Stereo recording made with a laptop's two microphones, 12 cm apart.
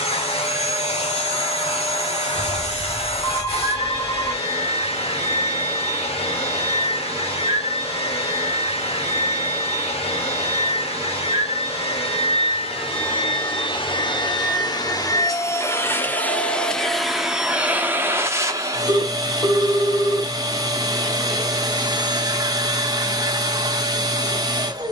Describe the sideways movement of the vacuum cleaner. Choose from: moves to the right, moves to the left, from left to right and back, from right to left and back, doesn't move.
moves to the right.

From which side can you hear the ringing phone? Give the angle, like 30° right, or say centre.
30° left.